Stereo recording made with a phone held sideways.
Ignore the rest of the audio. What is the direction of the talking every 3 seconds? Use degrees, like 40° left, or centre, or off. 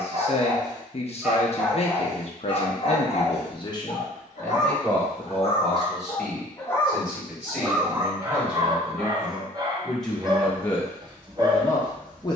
50° left, 20° left, 10° right, 10° left.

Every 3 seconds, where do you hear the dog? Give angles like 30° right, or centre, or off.
centre, 50° left, 10° right, 30° right.